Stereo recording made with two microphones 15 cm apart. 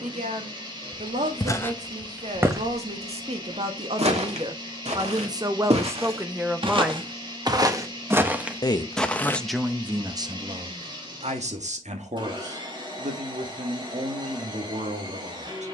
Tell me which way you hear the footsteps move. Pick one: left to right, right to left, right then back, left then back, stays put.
right then back.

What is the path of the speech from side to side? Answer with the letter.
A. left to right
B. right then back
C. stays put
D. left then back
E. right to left
D.